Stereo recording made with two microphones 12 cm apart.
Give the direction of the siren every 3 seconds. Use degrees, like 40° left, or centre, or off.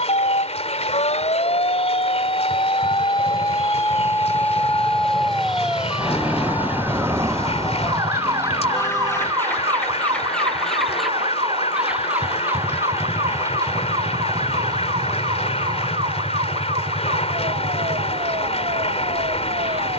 50° left, 10° left, 20° right, 40° right, 50° right, 50° right, 50° right.